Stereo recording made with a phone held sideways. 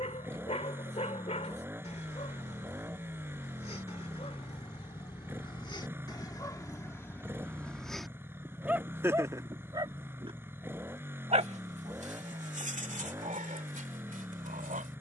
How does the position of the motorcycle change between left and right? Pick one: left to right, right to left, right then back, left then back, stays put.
stays put.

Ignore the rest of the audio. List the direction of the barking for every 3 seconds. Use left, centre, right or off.
left, left, centre, right, right.